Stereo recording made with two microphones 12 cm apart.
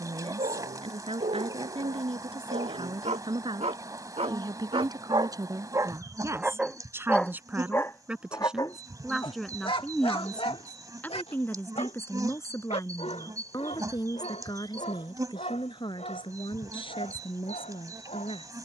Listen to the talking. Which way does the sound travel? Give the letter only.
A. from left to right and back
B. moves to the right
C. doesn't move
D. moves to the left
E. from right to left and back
D.